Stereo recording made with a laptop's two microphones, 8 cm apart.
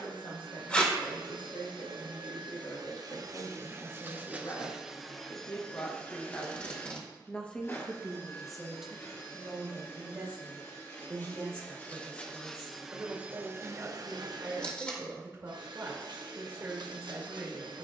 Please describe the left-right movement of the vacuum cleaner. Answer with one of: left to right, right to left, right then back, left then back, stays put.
left then back.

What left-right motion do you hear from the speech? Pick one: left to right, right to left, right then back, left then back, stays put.
left to right.